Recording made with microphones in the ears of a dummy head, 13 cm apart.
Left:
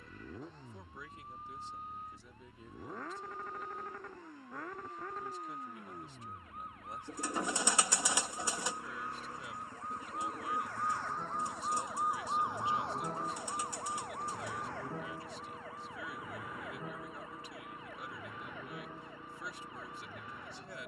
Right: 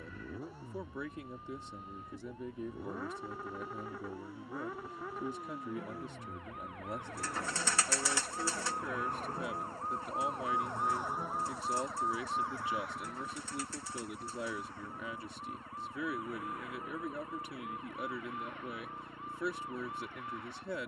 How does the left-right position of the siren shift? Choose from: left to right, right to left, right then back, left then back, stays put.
right to left.